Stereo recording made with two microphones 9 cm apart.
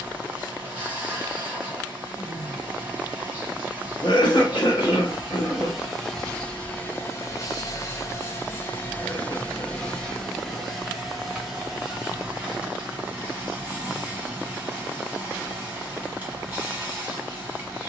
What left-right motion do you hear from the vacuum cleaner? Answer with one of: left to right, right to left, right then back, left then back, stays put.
left then back.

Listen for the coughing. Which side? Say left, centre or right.
left.